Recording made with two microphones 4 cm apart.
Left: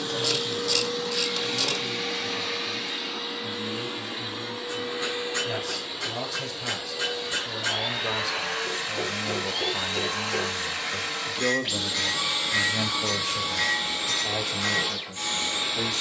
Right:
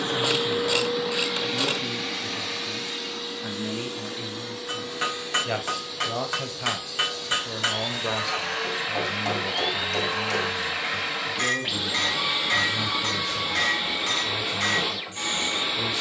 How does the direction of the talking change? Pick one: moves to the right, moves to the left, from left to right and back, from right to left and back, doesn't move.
moves to the left.